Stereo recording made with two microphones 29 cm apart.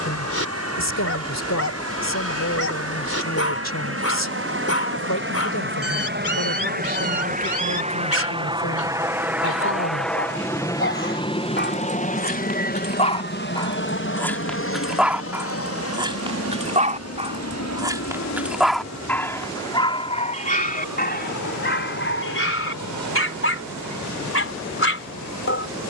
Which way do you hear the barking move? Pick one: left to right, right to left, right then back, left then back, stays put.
right then back.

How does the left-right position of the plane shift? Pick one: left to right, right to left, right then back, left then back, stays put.
right to left.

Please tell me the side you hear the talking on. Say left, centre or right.
left.